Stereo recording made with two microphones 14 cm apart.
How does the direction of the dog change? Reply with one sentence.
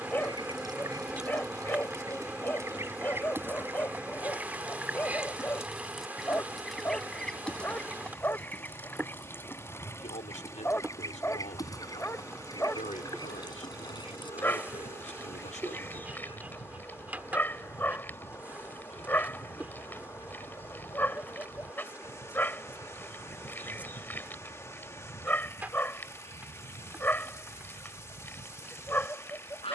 In this clip you hear the dog stay put.